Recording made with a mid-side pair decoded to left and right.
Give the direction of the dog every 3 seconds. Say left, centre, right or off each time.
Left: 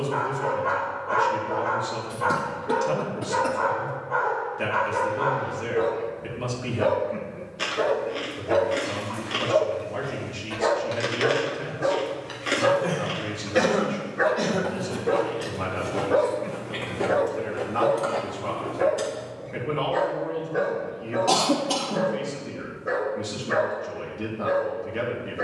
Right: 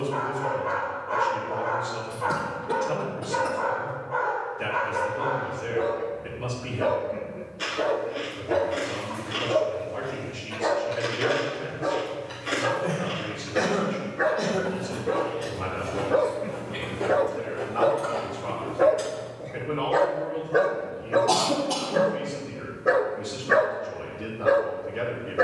left, left, left, left, left, centre, right, right, right.